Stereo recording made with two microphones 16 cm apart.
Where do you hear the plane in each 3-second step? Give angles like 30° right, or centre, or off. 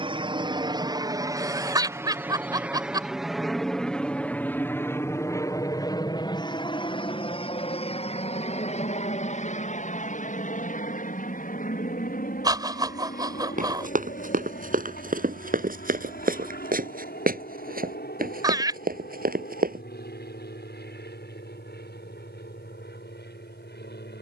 20° right, 10° left, 30° left, 50° left, 50° left, 60° left, 60° left, 70° left.